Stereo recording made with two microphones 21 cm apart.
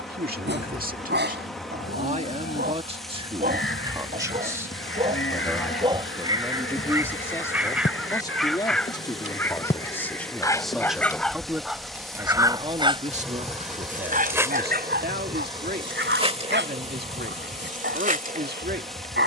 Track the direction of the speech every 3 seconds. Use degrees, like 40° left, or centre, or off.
40° right, 10° right, 10° left, centre, 40° right, 50° right, 50° right.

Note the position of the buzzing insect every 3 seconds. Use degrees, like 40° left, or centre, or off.
60° left, 50° left, 40° left, 20° left, 10° right, 30° right, 40° right.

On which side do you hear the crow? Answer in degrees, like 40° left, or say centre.
70° left.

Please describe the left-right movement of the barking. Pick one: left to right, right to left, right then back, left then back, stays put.
left then back.